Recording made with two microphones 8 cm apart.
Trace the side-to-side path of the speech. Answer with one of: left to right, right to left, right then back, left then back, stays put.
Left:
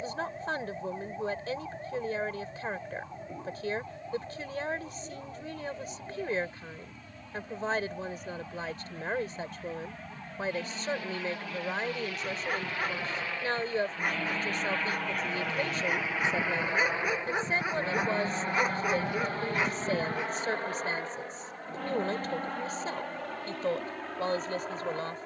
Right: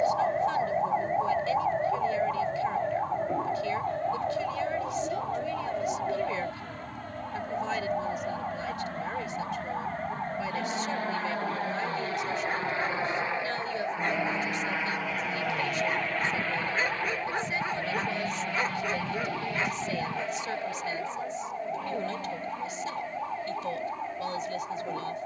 stays put.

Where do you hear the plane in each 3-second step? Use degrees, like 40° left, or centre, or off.
70° right, 70° right, 60° right, 50° right, 20° right, 10° left, 40° left, 50° left, 60° left.